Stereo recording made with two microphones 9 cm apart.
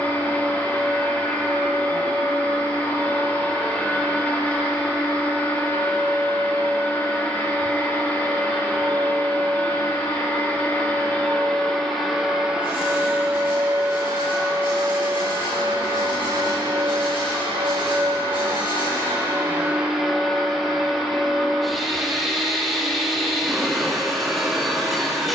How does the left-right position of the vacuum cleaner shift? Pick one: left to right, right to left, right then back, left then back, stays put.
right then back.